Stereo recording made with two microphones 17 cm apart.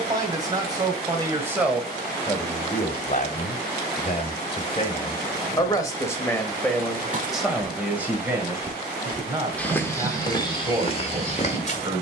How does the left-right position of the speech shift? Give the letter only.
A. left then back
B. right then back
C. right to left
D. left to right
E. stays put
A.